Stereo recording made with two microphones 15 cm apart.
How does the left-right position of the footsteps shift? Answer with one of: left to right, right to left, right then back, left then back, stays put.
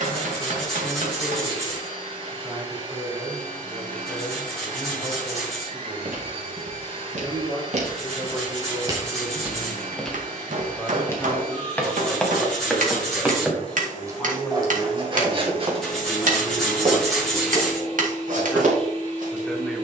left then back.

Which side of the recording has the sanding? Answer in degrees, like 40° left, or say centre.
centre.